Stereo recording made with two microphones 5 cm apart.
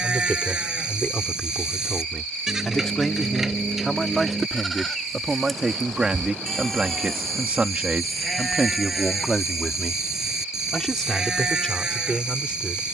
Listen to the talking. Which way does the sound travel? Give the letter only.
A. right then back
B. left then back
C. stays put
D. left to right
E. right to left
A.